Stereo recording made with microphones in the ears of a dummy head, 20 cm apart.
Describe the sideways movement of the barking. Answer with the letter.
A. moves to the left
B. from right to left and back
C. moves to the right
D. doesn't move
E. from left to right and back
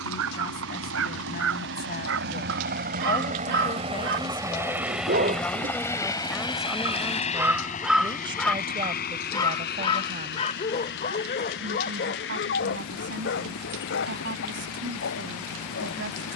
A.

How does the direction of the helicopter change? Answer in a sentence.
You can hear the helicopter move to the left.